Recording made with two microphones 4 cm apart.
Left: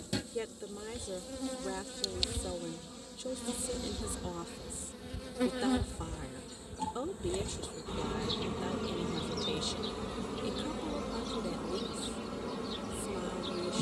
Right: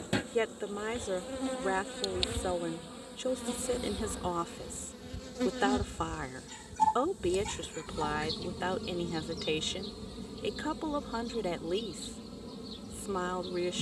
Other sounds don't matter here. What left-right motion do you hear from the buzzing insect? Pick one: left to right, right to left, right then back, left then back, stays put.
right to left.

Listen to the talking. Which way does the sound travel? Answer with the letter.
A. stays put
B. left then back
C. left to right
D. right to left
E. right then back
A.